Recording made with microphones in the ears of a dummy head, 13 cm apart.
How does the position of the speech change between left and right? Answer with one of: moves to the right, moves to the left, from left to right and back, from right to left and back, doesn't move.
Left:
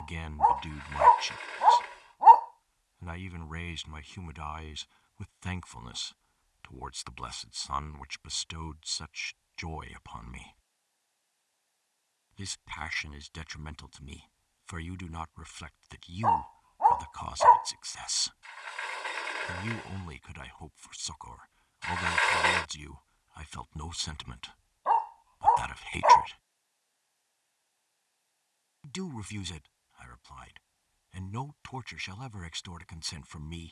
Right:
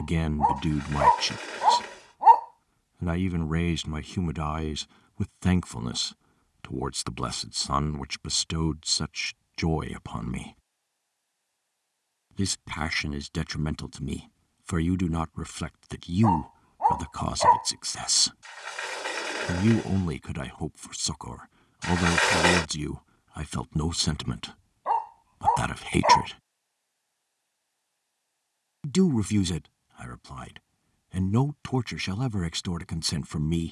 doesn't move.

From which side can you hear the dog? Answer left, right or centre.
centre.